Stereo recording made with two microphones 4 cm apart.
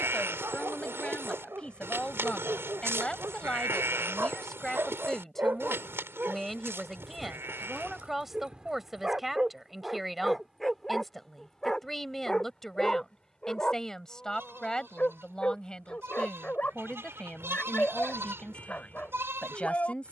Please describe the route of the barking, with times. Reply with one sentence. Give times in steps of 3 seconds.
In this clip you hear the barking on the right from 0 s, in the centre from 9 s and on the left from 12 s.